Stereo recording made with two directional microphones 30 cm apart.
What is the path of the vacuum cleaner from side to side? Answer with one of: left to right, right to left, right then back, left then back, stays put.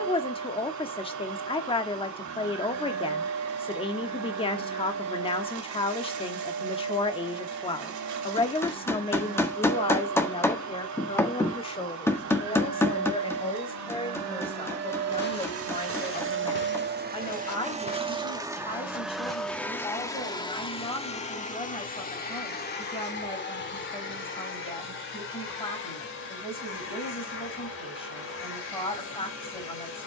right to left.